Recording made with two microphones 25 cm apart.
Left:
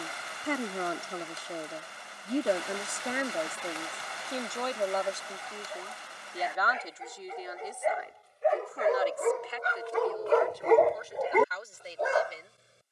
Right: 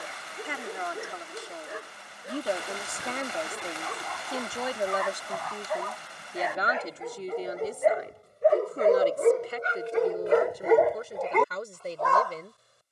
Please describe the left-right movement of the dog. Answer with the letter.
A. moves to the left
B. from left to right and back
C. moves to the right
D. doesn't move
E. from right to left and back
A.